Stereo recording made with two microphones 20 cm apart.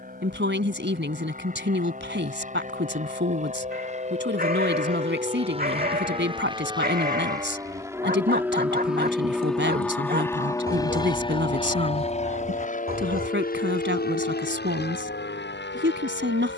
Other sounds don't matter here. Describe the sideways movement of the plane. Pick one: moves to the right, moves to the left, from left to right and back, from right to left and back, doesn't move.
moves to the left.